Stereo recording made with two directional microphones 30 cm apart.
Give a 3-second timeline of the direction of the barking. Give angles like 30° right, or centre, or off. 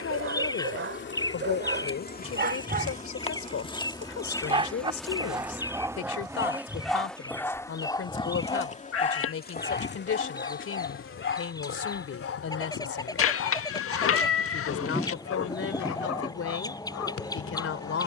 40° right, 20° right, 10° left, 40° left, 50° left, 70° left.